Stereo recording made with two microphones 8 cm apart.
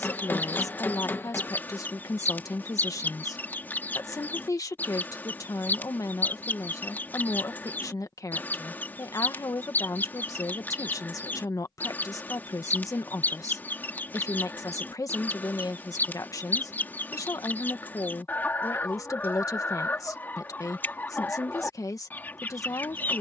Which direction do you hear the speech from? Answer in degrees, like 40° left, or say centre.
40° left.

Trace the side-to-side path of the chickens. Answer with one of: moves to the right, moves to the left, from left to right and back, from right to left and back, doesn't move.
doesn't move.